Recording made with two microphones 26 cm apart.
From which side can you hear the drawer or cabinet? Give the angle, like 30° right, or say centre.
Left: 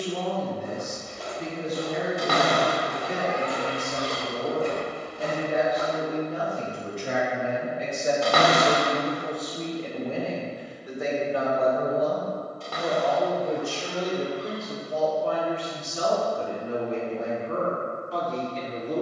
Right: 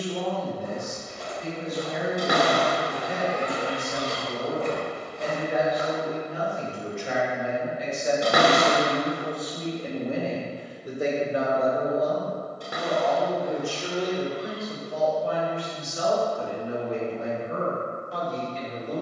20° right.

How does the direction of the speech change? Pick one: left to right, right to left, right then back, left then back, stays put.
right then back.